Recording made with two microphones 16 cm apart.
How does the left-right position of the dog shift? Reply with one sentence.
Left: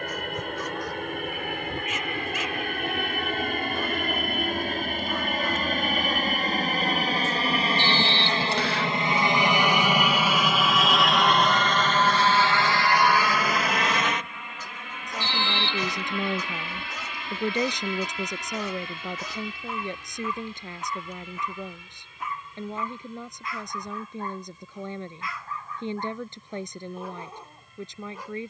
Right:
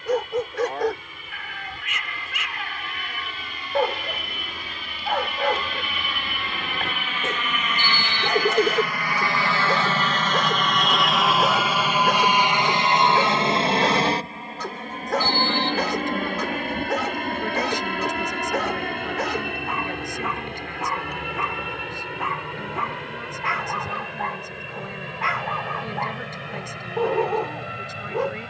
In this clip you hear the dog stay put.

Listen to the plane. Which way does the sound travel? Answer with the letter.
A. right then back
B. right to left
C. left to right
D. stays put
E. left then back
C.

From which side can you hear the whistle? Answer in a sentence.
In this clip you hear the whistle on the left.